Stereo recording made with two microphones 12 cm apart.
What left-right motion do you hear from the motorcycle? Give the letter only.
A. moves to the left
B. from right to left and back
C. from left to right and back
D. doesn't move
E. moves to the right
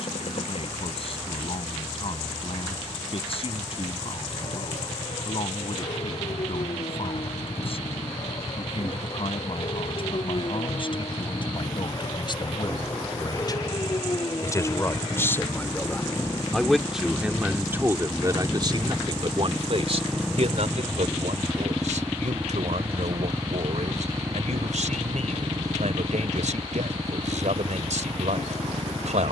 E.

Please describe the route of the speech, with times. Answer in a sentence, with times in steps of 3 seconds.
You can hear the speech on the left from 0 s, in the centre from 15 s and on the right from 18 s.